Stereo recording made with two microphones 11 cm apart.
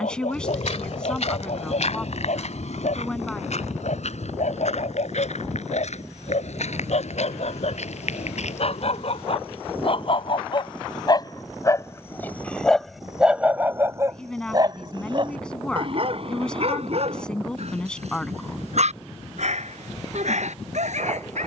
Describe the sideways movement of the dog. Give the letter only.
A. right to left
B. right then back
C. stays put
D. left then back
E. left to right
E.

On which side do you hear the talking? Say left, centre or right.
centre.